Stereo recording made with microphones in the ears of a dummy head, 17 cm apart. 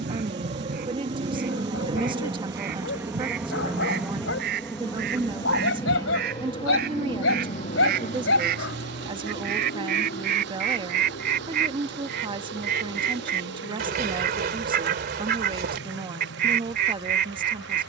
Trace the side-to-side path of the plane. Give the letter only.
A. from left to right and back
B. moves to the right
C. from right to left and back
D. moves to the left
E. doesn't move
D.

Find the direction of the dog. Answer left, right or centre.
left.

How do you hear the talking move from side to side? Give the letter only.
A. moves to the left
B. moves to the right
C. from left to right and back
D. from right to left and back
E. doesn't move
E.